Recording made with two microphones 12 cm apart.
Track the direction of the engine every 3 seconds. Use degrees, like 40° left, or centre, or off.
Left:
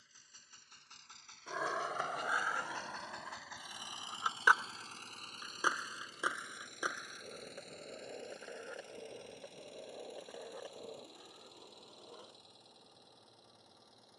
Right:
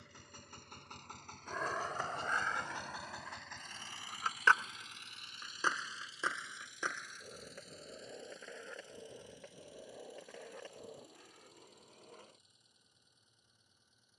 40° right, 30° left, 60° left, 70° left, 70° left.